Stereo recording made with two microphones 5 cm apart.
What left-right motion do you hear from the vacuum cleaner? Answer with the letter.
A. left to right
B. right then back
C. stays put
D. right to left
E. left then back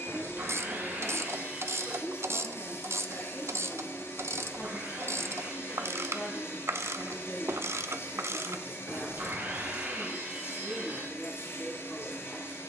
C.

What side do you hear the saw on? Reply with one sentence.
You can hear the saw on the right.